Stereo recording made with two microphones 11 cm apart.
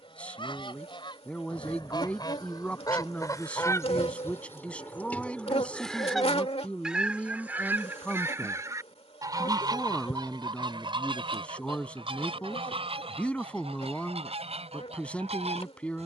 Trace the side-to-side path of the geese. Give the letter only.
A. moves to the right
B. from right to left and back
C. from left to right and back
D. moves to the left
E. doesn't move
A.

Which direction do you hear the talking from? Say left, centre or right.
centre.